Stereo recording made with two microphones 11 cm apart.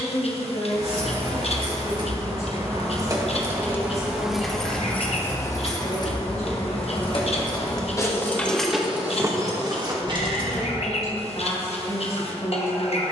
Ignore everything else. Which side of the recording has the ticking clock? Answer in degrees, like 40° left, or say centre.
70° left.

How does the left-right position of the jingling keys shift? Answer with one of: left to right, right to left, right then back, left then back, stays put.
left then back.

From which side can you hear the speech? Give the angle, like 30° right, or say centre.
70° left.